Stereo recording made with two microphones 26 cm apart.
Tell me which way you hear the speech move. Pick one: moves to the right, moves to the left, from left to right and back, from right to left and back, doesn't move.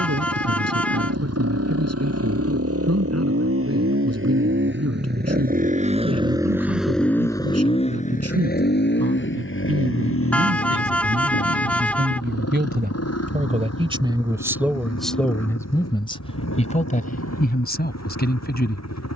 moves to the left.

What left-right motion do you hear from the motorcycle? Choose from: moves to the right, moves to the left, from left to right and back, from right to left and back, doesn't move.
moves to the left.